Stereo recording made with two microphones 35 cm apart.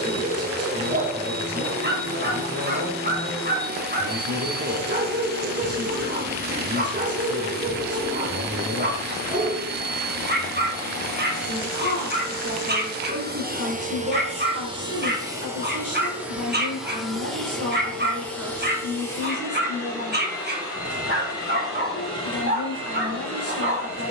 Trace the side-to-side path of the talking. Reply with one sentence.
In this clip you hear the talking stay put.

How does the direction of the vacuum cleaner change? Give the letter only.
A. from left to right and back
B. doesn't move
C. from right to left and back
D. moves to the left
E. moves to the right
D.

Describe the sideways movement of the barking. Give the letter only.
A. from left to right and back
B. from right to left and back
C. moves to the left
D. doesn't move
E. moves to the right
D.